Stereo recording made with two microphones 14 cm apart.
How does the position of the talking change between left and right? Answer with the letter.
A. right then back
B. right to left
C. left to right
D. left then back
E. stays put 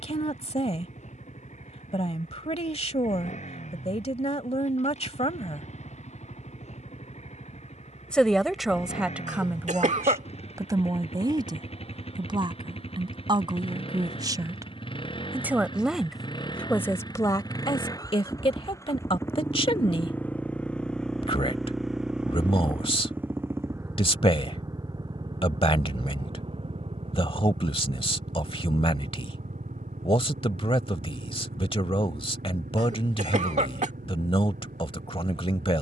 A.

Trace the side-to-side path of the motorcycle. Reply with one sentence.
You can hear the motorcycle travel towards the right.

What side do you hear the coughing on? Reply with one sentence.
You can hear the coughing on the right.